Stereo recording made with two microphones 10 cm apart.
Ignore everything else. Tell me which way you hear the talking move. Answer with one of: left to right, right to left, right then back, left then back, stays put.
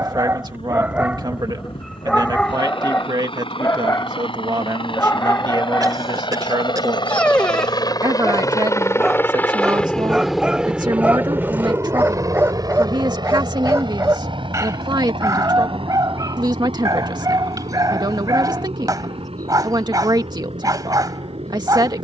stays put.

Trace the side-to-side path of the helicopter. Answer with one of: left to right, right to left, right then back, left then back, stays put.
left to right.